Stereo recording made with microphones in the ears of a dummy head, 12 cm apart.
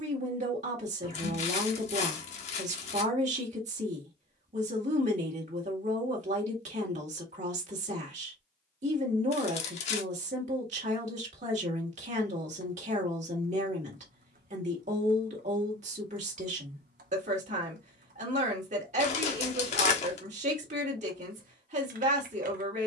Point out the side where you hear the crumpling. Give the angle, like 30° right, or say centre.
50° left.